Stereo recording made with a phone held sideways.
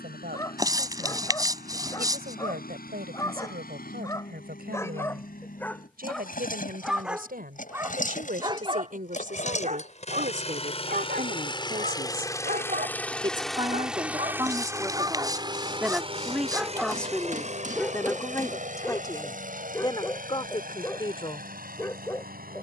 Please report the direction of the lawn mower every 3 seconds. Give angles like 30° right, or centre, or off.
70° left, 70° left, 60° left, 40° left, centre, 40° right, 60° right, 70° right.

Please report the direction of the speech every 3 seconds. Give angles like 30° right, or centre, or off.
80° right, 80° right, 70° right, 50° right, 30° right, centre, 30° left, 40° left.